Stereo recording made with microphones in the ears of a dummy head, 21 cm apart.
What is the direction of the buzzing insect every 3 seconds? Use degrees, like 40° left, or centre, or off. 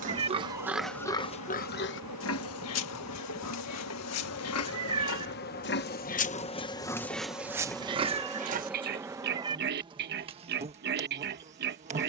70° left, 50° left, 10° left, 20° right.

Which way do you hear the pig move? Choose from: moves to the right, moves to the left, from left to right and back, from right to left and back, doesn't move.
from right to left and back.